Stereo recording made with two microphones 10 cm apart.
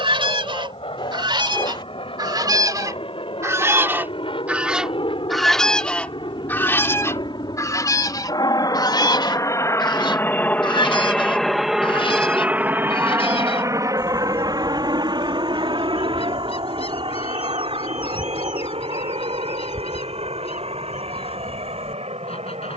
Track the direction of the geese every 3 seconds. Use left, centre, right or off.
right, centre, left, left, left, left, left, left.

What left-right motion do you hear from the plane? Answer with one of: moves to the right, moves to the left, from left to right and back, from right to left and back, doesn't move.
moves to the right.